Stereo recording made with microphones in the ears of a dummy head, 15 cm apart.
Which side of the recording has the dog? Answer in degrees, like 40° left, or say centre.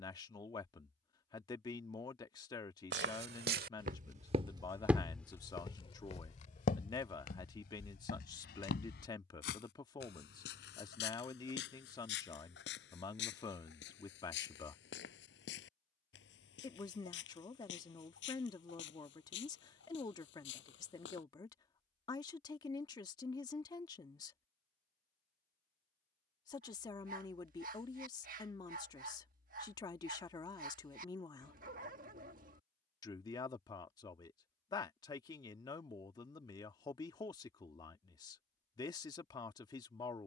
50° right.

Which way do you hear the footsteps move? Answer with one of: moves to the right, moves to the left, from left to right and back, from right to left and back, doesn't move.
moves to the left.